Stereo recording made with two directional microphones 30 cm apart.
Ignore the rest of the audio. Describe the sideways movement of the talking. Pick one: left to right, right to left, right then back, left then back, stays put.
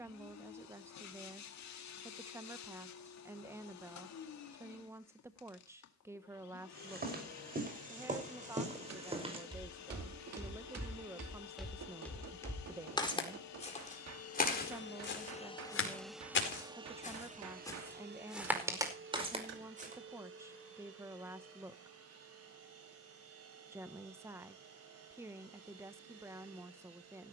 stays put.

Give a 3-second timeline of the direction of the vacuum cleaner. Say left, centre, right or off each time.
left, left, left, left, left, centre, right, right, right.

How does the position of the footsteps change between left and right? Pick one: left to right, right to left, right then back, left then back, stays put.
left then back.